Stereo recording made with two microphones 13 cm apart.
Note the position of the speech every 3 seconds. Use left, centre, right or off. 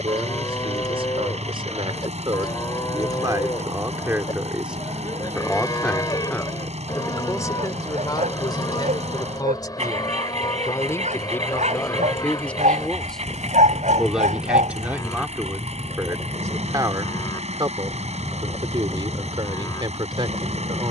right, centre, left, left, centre, right, right.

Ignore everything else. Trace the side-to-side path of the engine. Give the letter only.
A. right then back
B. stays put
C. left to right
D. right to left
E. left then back
B.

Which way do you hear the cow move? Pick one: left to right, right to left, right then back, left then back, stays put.
stays put.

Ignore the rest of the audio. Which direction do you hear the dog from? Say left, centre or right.
right.